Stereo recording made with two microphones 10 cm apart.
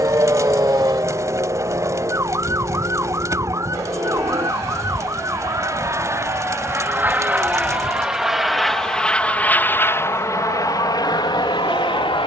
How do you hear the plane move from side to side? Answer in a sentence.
You can hear the plane go from the right side to the left.